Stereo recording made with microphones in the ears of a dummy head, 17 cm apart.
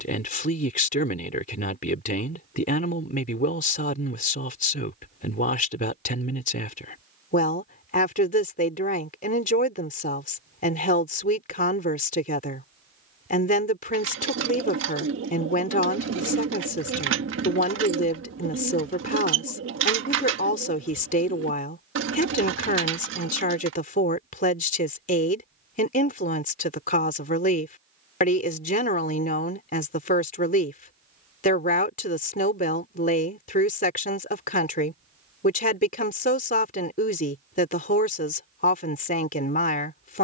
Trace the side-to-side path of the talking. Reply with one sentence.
You can hear the talking stay in one place.